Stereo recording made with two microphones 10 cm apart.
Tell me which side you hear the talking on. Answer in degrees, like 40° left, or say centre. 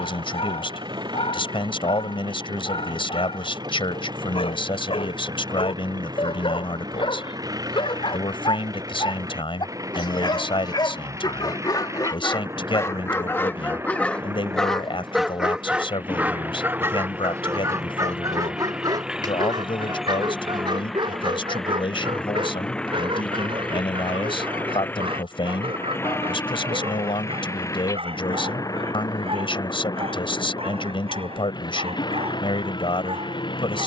60° left.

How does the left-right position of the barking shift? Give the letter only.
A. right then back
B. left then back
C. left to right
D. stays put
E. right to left
C.